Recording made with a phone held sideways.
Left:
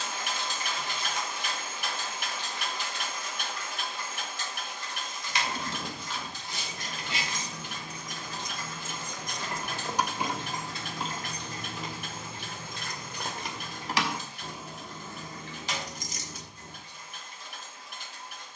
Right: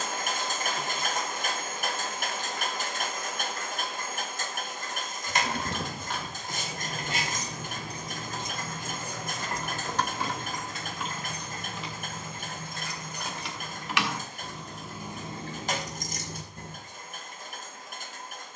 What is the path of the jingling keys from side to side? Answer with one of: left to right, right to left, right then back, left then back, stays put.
left then back.